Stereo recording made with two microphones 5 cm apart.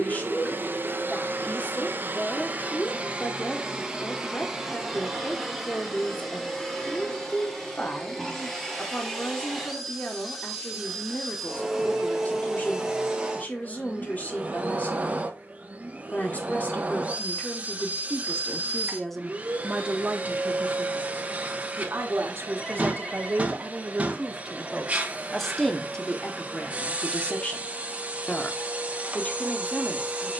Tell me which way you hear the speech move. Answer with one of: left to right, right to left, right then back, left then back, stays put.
right then back.